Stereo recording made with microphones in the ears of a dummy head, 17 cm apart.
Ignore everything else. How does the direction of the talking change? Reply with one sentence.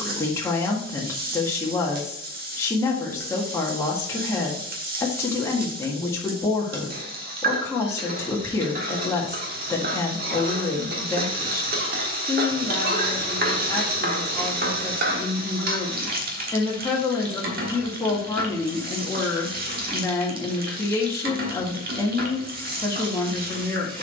In this clip you hear the talking stay put.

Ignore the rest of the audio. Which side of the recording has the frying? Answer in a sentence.
You can hear the frying on the right.